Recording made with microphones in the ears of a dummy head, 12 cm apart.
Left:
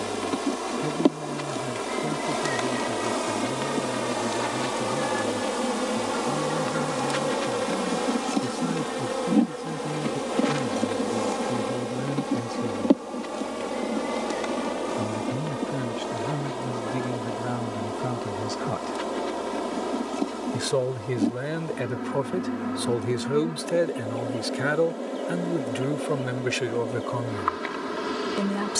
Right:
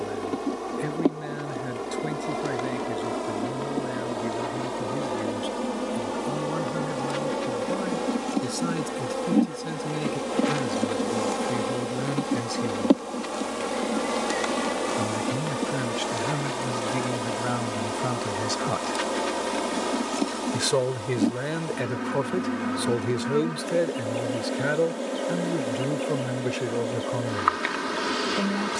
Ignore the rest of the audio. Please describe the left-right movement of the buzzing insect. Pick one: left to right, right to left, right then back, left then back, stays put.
left to right.